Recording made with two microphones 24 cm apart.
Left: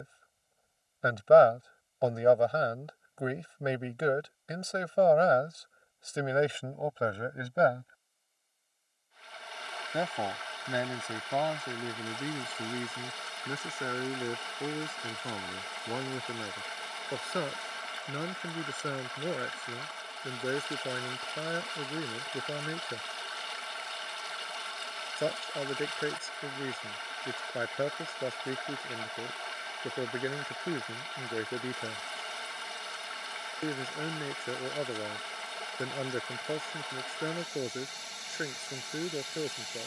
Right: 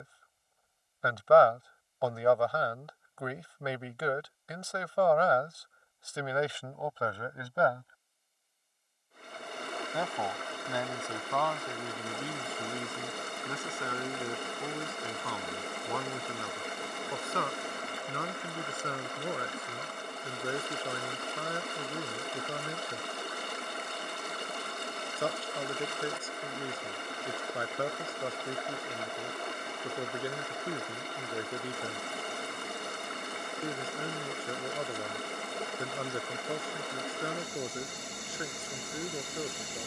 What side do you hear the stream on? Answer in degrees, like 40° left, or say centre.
50° right.